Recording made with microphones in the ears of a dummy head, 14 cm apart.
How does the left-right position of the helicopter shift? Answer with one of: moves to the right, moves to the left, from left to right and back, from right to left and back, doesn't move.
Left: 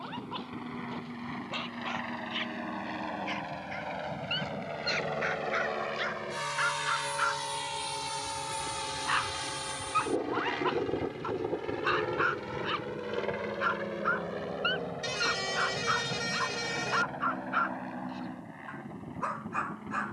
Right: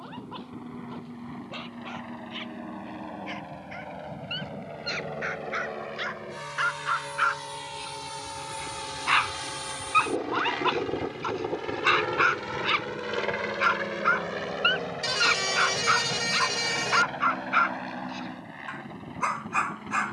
moves to the right.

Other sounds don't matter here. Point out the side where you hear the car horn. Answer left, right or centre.
right.